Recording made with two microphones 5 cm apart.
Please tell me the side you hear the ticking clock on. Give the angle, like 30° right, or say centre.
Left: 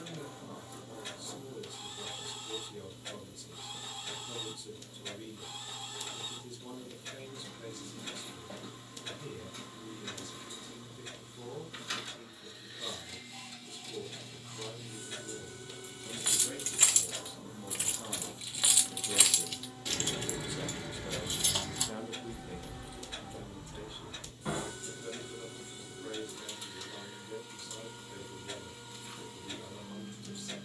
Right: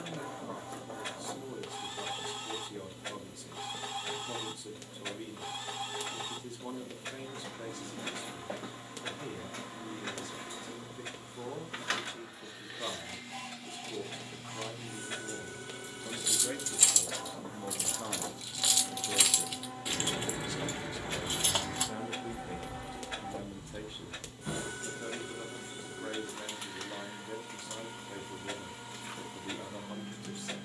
60° right.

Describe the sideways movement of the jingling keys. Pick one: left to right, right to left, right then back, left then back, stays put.
right then back.